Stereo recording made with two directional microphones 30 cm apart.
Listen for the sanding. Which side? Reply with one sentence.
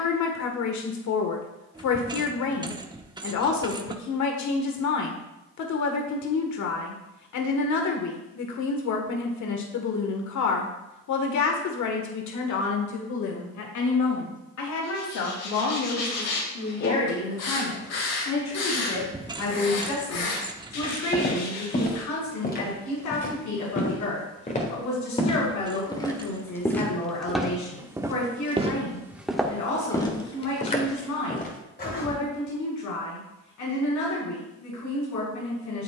You can hear the sanding on the left.